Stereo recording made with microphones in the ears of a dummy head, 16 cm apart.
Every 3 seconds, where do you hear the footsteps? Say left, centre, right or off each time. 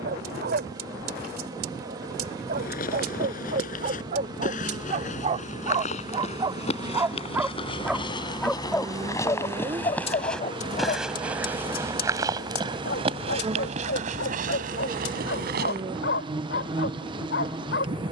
left, left, left, centre, right, right.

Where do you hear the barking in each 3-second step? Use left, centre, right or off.
right, right, centre, left, left, left.